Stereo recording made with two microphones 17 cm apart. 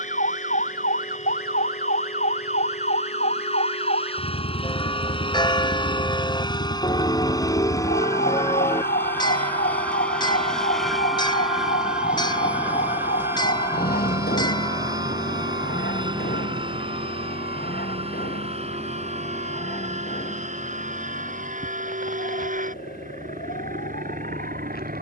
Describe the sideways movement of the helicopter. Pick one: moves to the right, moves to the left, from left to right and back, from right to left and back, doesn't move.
moves to the right.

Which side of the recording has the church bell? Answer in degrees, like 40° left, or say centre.
30° left.